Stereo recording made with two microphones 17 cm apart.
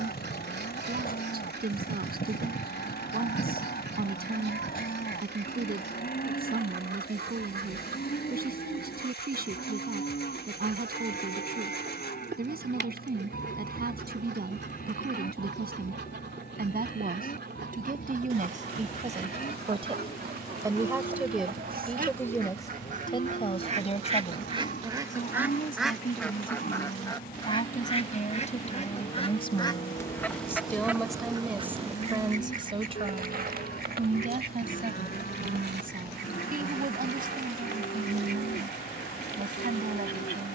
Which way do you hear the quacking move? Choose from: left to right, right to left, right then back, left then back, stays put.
left then back.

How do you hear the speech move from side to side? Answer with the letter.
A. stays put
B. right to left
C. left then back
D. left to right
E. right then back
C.